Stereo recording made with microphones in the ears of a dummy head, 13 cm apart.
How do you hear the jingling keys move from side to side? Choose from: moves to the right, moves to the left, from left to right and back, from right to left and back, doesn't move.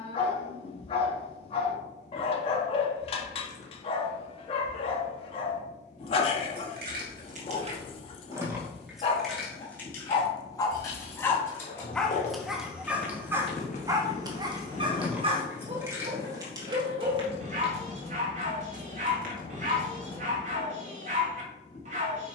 from right to left and back.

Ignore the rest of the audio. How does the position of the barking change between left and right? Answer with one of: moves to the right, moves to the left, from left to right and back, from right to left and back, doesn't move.
moves to the right.